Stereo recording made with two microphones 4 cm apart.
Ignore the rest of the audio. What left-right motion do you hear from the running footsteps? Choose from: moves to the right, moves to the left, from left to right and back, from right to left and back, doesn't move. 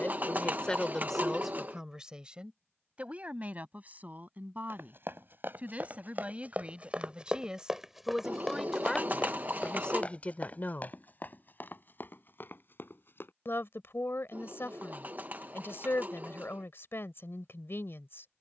moves to the left.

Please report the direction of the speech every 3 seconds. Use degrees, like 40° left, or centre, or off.
centre, 40° right, 20° right, 30° left, 60° left, 60° left.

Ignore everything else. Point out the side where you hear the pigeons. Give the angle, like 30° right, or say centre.
40° right.